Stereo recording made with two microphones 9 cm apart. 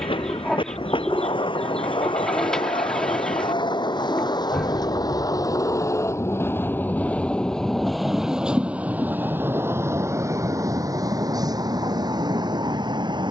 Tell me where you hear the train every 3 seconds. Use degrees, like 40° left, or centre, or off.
70° left, 50° left, 10° left, 30° right, 50° right.